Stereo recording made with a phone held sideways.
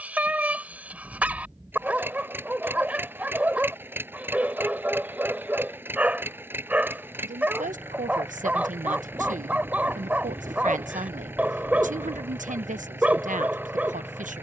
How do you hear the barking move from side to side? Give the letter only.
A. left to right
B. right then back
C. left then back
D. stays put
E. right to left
D.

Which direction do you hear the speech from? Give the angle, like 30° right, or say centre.
60° right.